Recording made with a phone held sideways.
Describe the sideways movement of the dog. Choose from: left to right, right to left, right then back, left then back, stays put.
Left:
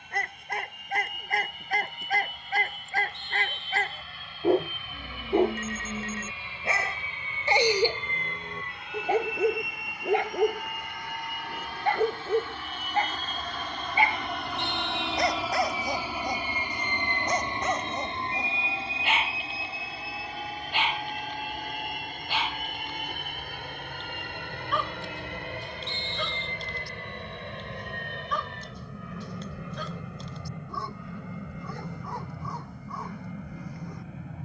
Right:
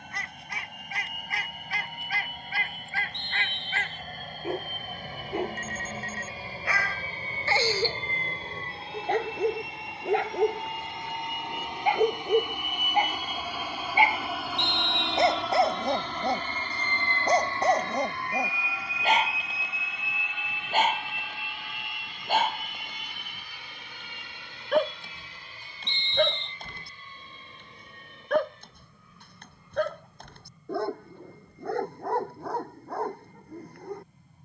left to right.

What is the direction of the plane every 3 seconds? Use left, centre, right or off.
right, right, right, right, centre, centre, left, left, left, left, left, left.